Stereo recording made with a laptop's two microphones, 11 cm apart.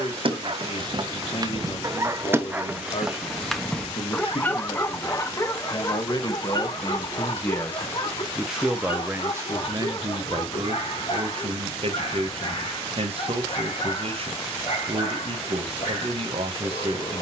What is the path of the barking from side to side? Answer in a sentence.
In this clip you hear the barking go from the right side to the left.